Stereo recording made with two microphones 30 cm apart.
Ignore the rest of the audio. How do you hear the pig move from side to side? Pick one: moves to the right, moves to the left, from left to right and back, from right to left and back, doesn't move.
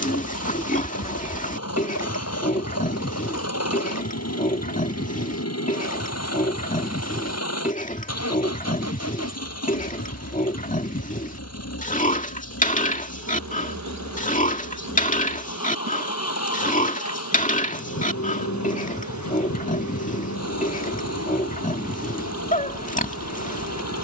doesn't move.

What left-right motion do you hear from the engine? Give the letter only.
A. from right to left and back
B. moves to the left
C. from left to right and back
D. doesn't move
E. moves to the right
D.